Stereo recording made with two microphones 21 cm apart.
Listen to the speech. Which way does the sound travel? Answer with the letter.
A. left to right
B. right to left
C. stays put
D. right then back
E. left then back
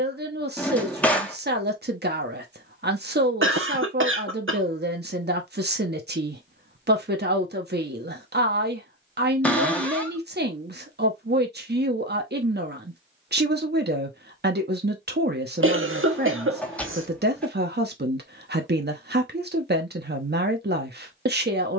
C.